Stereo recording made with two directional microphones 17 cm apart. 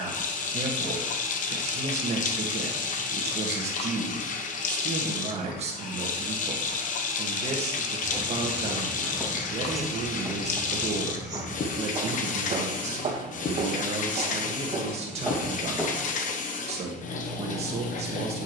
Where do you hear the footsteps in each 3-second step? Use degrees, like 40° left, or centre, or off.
off, off, 10° left, 10° right, 40° right, centre.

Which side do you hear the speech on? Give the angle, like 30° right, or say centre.
40° right.